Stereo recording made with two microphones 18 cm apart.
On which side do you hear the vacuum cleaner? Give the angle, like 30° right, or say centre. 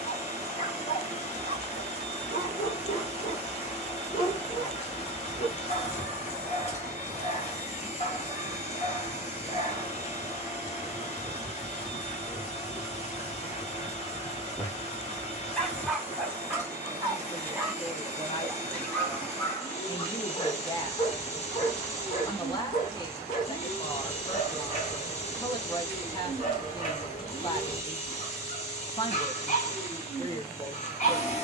40° left.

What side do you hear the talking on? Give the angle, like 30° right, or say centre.
20° left.